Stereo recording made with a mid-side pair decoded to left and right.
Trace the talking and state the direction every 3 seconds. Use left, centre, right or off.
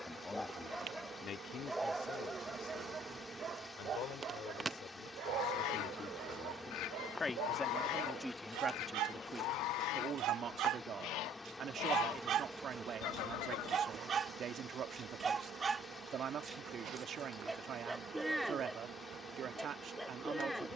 left, left, centre, right, right, right, right.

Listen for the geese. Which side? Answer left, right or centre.
left.